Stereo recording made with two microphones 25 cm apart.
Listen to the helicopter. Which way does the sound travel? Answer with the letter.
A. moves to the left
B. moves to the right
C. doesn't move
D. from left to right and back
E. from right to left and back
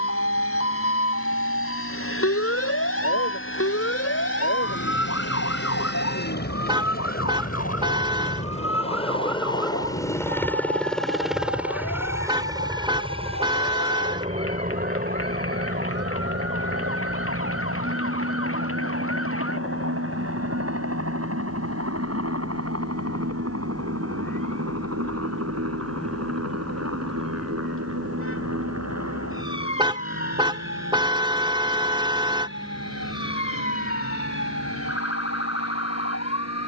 B.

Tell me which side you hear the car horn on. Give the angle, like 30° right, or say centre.
20° right.